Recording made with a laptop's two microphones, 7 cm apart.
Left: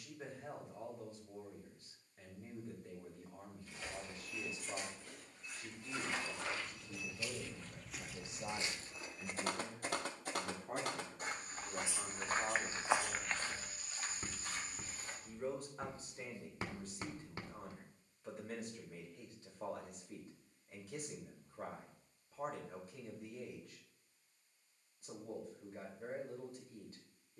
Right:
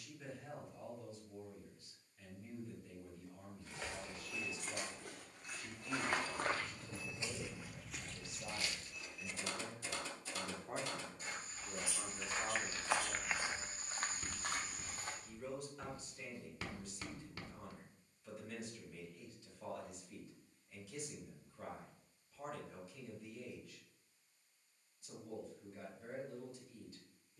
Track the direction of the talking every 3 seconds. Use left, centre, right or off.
left, left, left, centre, centre, left, left, left, left.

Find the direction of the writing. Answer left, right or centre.
left.